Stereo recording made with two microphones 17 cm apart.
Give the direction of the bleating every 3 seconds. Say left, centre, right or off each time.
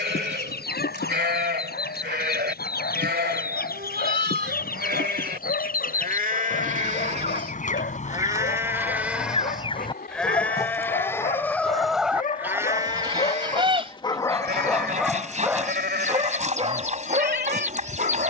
right, right, right, centre, right, right.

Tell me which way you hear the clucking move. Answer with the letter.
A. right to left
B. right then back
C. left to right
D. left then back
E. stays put
C.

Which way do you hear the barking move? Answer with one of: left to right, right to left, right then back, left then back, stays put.
left to right.